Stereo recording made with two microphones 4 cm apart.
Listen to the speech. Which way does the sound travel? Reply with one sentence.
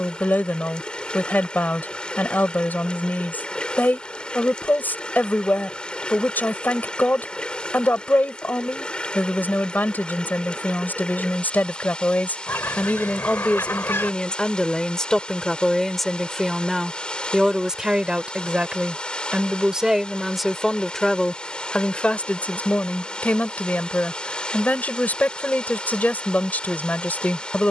You can hear the speech move from left to right and back again.